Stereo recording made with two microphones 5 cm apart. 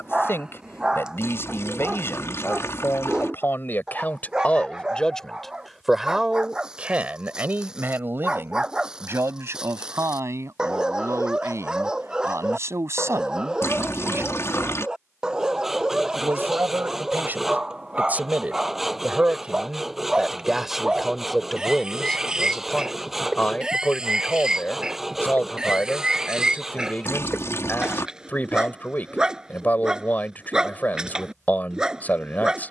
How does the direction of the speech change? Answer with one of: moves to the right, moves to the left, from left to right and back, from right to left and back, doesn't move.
from left to right and back.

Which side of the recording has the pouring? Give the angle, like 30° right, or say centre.
50° left.